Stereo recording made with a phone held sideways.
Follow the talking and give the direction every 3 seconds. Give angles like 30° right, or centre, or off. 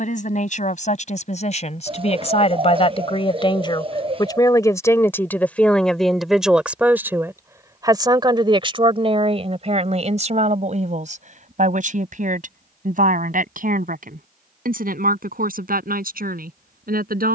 50° left, 20° left, 20° right, 50° right, 60° right, 70° right.